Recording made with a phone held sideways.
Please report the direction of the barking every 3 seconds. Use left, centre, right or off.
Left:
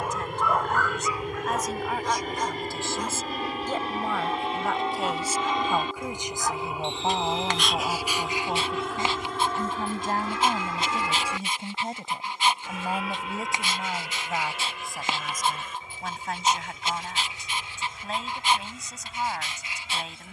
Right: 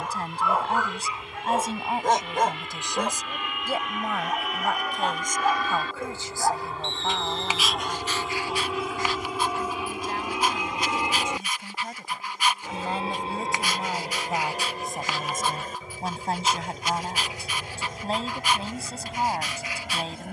right, right, centre, left, left, left, left.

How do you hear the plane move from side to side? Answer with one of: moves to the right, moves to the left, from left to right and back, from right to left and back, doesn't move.
moves to the right.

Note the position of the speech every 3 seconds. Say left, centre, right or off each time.
right, centre, left, left, centre, right, right.